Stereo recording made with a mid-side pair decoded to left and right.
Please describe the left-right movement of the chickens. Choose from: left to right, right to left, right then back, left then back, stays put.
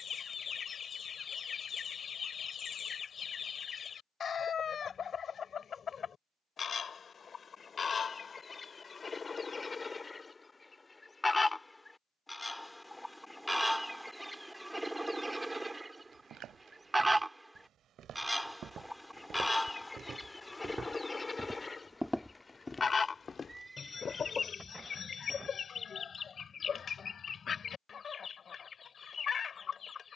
right then back.